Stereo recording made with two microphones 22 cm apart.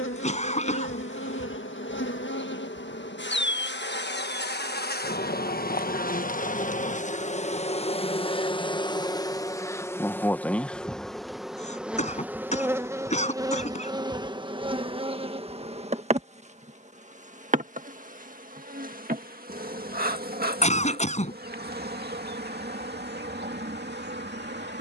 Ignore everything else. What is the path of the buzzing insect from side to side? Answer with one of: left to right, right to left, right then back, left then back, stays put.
left to right.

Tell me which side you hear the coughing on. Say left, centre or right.
left.